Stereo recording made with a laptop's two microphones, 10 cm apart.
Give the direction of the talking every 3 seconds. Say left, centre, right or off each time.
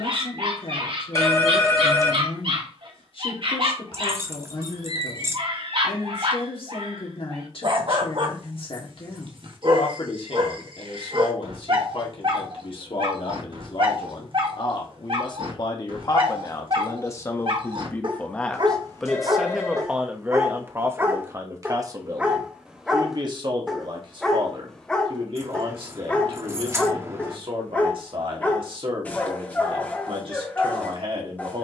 left, left, left, left, left, left, centre, right, right, right, right.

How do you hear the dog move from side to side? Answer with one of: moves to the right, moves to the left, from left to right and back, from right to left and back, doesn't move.
moves to the left.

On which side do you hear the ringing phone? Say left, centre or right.
left.